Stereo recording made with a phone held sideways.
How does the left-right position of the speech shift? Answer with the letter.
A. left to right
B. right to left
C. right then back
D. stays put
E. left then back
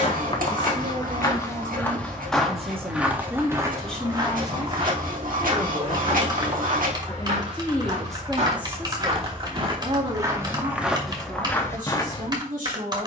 E.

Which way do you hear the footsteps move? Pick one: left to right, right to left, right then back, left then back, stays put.
right then back.